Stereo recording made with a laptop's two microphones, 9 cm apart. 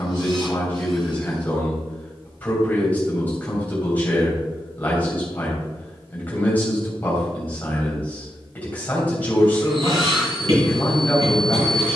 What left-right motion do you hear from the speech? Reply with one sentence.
You can hear the speech stay in one place.